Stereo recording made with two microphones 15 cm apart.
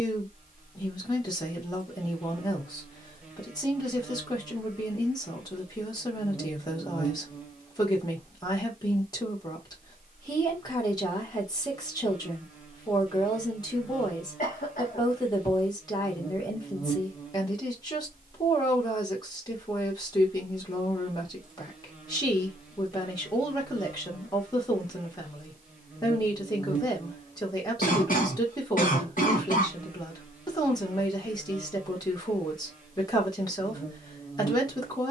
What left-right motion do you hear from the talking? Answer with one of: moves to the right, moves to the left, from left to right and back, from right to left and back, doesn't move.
doesn't move.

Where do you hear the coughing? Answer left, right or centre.
left.